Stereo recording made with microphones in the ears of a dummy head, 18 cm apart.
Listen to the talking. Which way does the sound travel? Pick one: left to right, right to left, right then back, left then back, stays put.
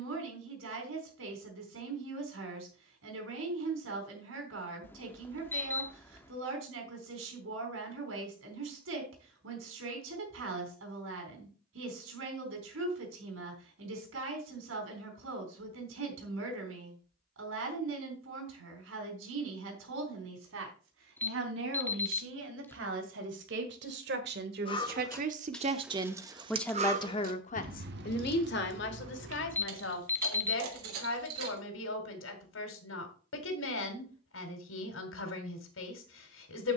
right to left.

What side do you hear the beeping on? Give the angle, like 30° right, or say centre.
10° left.